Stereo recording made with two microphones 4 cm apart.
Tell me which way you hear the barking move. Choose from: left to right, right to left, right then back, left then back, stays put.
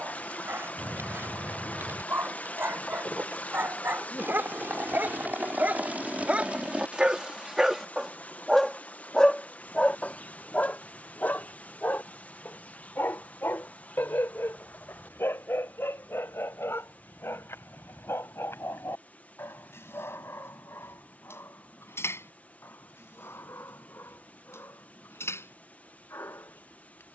right to left.